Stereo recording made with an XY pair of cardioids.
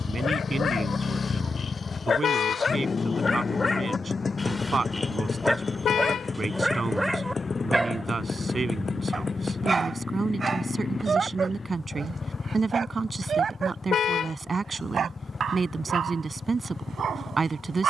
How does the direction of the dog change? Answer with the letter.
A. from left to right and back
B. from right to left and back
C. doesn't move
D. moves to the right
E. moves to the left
D.